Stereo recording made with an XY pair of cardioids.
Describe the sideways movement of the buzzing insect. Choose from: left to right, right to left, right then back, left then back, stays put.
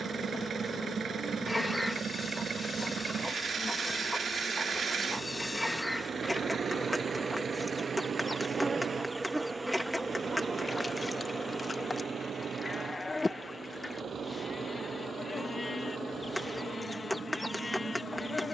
right then back.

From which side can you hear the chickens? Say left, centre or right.
centre.